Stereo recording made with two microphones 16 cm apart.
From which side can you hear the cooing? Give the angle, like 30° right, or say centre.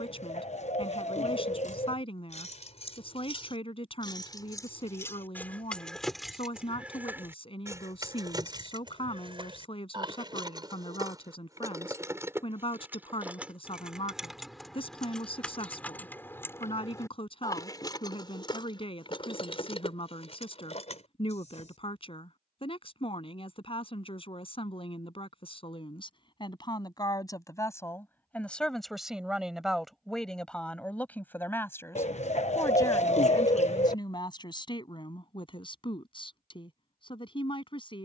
40° left.